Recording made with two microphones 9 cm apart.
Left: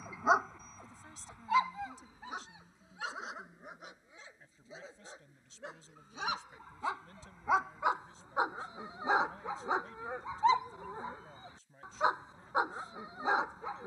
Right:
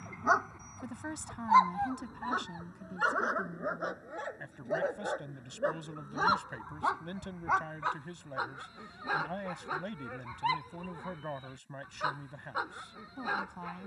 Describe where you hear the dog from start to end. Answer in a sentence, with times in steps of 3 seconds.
In this clip you hear the dog on the right from 0 s, in the centre from 6 s and on the left from 9 s.